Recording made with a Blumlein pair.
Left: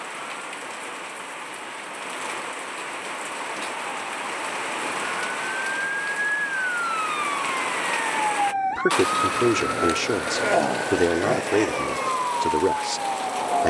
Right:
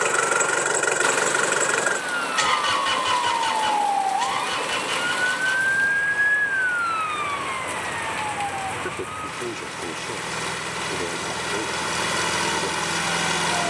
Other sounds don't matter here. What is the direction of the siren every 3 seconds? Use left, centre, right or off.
right, right, centre, left, left.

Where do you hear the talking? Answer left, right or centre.
left.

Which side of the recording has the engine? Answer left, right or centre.
right.